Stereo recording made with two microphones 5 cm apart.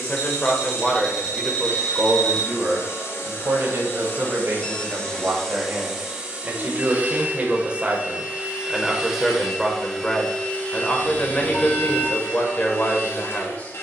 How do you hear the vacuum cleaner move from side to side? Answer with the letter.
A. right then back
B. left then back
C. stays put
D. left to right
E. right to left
A.